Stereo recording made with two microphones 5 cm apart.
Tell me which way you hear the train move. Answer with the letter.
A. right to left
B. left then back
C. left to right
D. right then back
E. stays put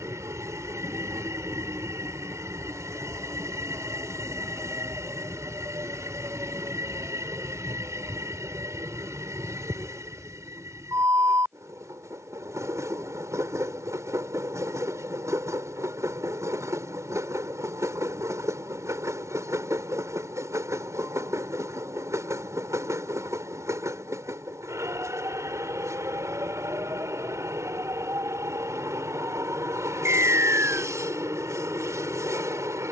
E.